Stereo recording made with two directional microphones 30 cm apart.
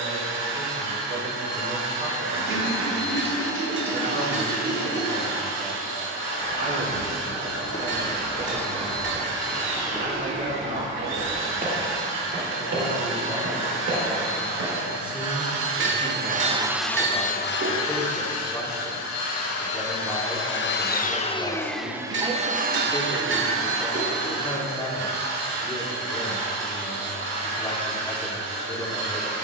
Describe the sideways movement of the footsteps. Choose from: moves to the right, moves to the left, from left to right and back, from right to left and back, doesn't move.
moves to the right.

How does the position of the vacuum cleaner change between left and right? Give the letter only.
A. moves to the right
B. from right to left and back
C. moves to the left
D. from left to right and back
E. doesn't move
B.